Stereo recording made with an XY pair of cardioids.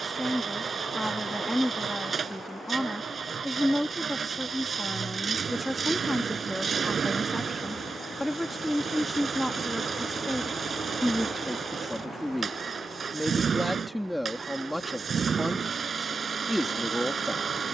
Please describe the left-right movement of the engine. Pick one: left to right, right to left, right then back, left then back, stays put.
stays put.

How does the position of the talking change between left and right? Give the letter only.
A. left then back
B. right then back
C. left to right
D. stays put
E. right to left
D.